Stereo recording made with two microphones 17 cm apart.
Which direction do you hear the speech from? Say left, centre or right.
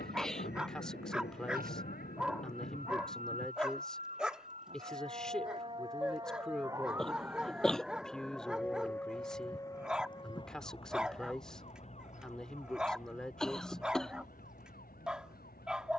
centre.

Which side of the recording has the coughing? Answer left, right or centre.
centre.